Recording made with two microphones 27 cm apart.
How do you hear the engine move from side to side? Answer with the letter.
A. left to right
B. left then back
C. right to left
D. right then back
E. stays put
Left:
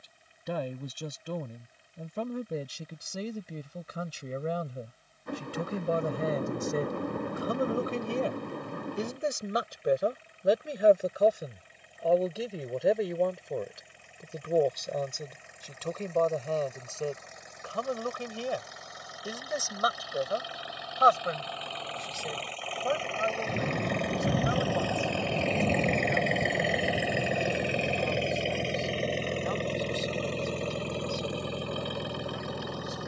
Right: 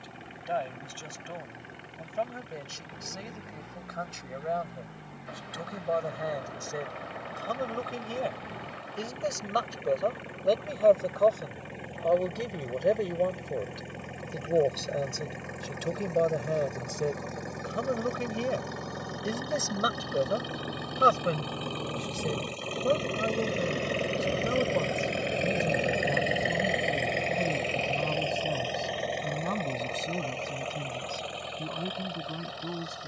C.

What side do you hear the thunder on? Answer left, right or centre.
left.